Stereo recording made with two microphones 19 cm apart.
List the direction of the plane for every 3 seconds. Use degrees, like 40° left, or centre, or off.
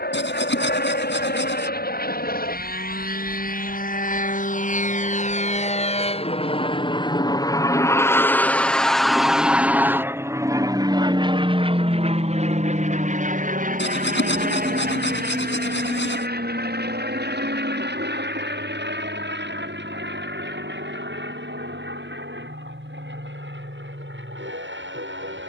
60° left, 50° left, 20° left, 20° right, 40° right, 50° right, 60° right, 70° right, 70° right.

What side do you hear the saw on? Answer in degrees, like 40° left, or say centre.
80° left.